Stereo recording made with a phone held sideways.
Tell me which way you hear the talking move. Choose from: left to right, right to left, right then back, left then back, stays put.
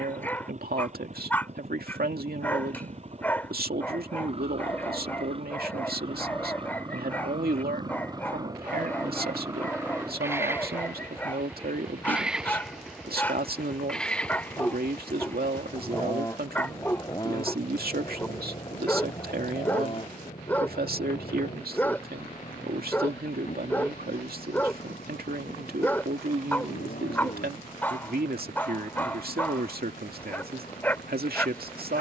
stays put.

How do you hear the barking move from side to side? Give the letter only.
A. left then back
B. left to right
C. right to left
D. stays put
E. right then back
D.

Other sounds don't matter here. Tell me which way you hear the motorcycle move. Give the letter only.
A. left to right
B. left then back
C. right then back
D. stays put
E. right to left
E.